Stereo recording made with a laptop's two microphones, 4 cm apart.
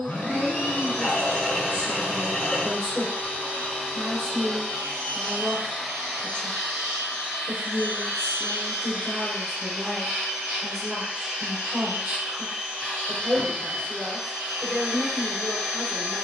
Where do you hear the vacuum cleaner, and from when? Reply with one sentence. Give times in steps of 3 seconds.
In this clip you hear the vacuum cleaner on the left from 0 s, in the centre from 3 s and on the right from 6 s.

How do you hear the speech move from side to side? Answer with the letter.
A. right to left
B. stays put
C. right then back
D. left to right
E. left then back
B.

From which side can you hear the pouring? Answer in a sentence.
You can hear the pouring in the centre.